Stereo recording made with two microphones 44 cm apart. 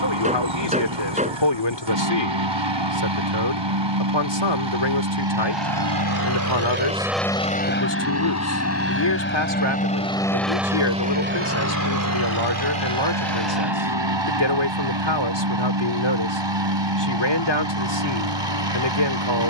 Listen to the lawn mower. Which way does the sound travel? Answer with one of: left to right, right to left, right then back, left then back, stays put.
left then back.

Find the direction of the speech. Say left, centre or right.
left.